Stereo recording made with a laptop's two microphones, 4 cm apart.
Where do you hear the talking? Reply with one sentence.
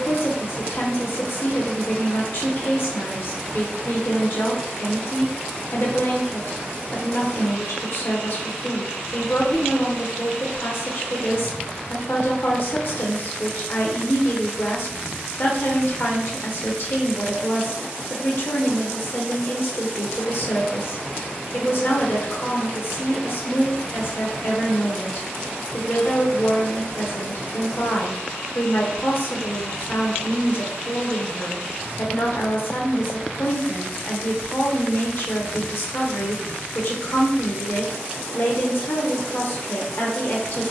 You can hear the talking on the left.